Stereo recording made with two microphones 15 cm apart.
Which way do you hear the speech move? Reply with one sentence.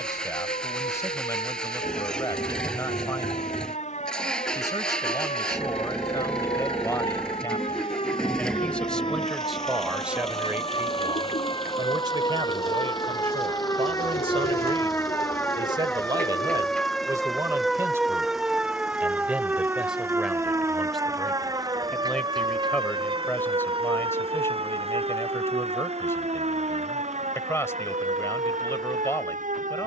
In this clip you hear the speech move from left to right and back again.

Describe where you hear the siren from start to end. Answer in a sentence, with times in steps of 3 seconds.
You can hear the siren on the left from 0 s, in the centre from 15 s and on the right from 21 s.